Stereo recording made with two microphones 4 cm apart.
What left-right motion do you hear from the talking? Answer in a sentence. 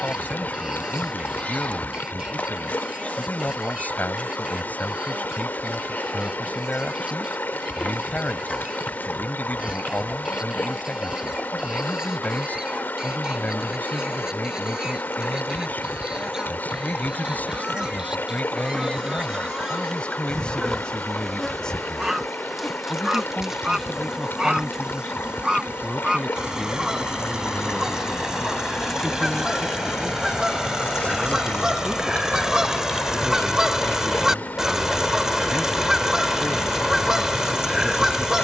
In this clip you hear the talking move to the right.